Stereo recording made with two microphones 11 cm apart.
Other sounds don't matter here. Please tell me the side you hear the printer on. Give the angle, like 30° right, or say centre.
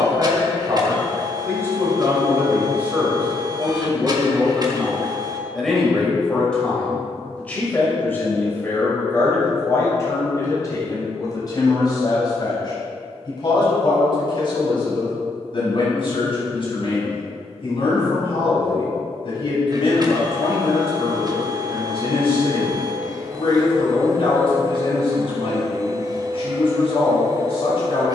40° right.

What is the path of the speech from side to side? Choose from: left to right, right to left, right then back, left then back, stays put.
right to left.